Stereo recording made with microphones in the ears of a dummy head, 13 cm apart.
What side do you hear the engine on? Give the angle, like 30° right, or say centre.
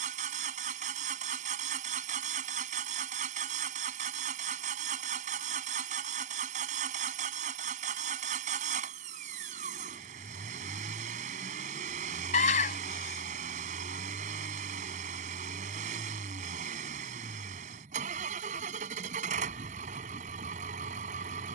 50° right.